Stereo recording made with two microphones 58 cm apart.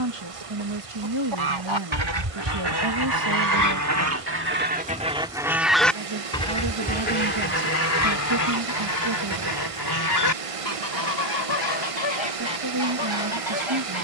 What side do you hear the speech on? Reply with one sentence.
You can hear the speech on the right.